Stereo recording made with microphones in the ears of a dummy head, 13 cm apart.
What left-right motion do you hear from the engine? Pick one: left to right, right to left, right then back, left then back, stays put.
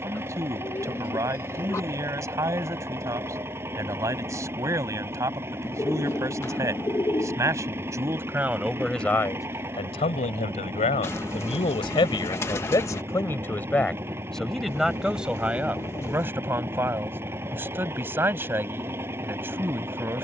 stays put.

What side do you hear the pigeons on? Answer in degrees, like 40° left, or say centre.
20° left.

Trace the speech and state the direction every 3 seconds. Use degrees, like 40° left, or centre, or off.
20° right, 20° right, 20° right, 40° left, 20° left, 10° right, 20° right.